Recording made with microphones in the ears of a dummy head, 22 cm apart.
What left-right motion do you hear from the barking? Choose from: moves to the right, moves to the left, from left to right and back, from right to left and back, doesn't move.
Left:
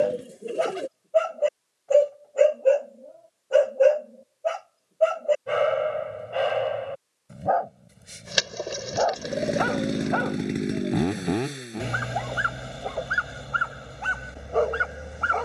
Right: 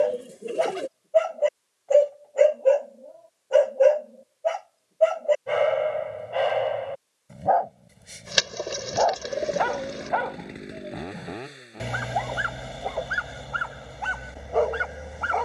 doesn't move.